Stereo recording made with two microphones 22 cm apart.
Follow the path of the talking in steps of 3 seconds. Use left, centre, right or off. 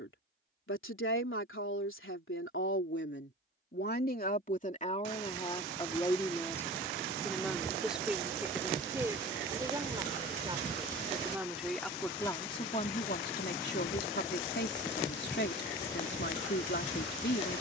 left, left, centre, centre, left, left.